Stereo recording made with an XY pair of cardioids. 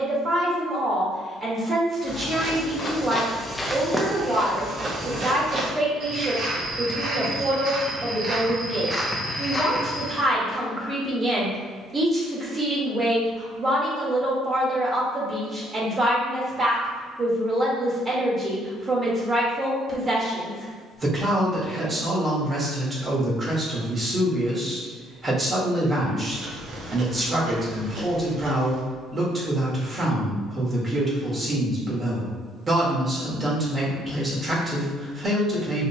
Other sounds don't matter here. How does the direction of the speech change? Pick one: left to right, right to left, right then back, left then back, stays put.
stays put.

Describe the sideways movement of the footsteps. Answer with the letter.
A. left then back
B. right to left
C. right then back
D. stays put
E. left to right
C.